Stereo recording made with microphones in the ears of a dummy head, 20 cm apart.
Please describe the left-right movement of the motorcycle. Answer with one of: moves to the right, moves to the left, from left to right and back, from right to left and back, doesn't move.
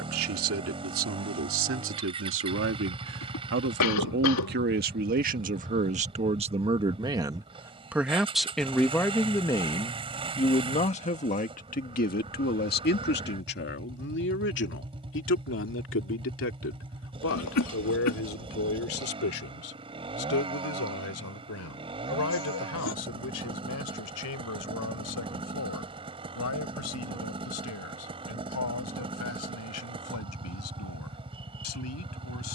doesn't move.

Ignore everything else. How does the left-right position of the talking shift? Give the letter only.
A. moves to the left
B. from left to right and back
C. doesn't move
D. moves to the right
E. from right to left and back
A.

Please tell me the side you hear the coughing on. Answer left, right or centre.
left.